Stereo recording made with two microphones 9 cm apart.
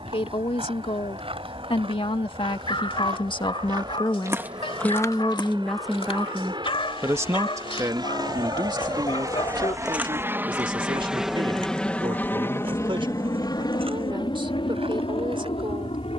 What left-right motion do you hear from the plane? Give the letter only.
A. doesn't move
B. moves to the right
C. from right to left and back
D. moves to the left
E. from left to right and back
D.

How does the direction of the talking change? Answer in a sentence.
In this clip you hear the talking move to the right.